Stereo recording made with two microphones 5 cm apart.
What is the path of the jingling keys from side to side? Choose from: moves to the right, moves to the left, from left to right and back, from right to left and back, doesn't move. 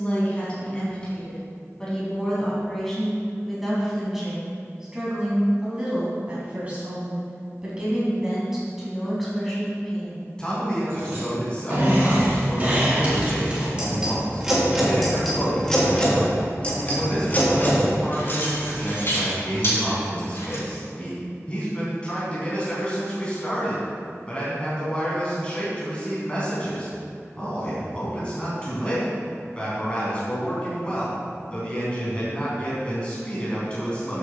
moves to the left.